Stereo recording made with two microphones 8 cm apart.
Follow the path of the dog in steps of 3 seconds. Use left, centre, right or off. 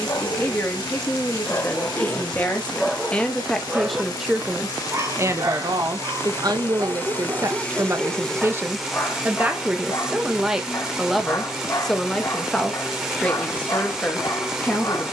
left, right, right, left, left.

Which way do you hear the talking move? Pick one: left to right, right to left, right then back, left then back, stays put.
right then back.